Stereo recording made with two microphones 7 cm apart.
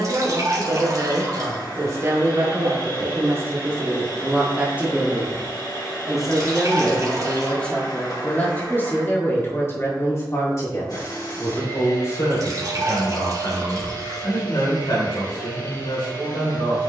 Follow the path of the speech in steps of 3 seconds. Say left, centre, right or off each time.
right, right, centre, left, left, left.